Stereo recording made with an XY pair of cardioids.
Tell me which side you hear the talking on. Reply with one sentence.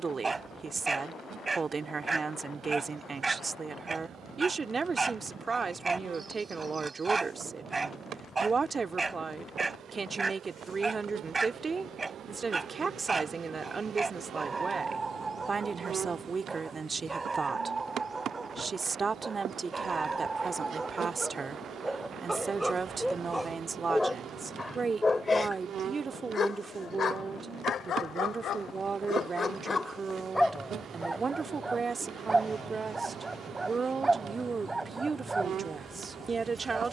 You can hear the talking on the right.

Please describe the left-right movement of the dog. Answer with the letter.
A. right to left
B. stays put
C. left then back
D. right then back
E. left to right
C.